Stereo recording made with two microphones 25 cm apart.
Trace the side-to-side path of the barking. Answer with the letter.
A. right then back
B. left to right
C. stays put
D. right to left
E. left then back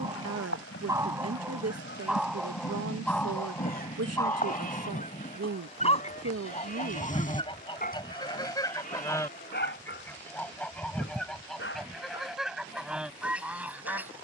D.